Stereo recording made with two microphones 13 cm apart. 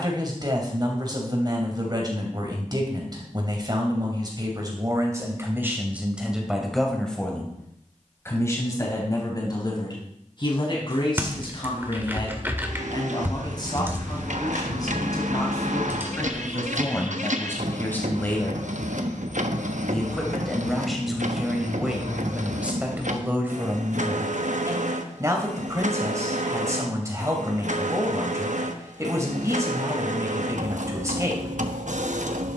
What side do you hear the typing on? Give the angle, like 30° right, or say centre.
20° right.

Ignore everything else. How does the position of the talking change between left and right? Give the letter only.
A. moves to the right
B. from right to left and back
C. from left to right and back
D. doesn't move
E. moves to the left
B.